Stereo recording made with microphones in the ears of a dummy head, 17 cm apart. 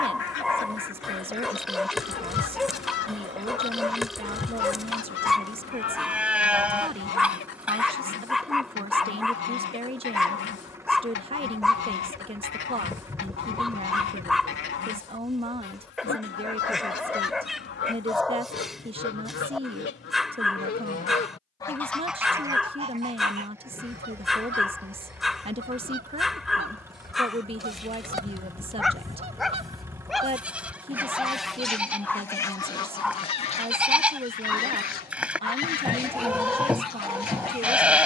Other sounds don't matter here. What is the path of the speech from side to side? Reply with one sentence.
You can hear the speech stay put.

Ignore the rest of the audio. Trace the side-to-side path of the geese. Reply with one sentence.
You can hear the geese go right and come back.